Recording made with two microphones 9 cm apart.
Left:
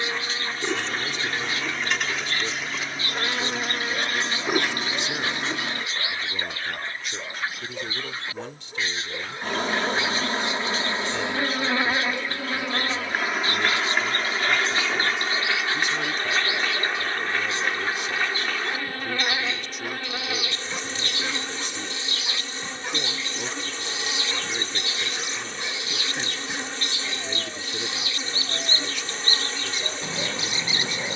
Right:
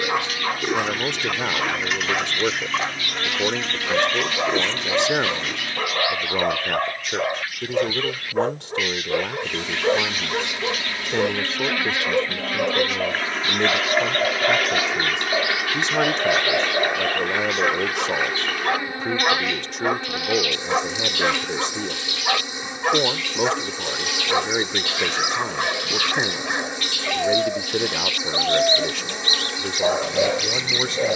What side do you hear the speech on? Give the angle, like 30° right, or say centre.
70° right.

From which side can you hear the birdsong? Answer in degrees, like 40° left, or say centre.
30° left.